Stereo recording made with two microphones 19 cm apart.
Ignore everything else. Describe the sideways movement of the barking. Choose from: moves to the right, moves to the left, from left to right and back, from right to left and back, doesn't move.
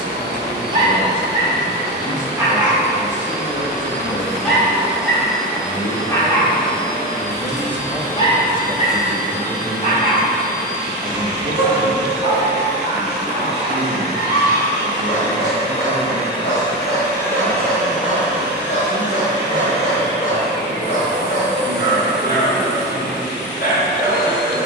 moves to the left.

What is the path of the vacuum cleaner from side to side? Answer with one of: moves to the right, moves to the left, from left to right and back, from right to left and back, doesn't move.
from right to left and back.